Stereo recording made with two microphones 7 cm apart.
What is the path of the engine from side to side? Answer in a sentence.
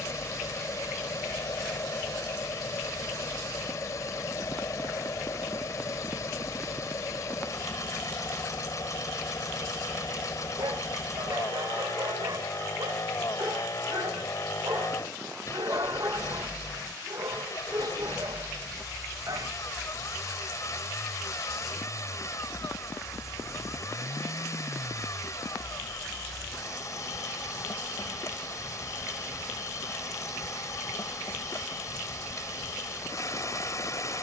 You can hear the engine stay in one place.